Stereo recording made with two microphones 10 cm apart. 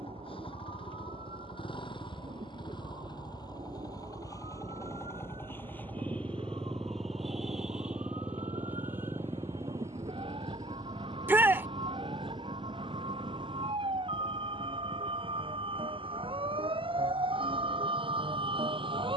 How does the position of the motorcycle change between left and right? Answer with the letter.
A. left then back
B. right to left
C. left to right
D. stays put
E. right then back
C.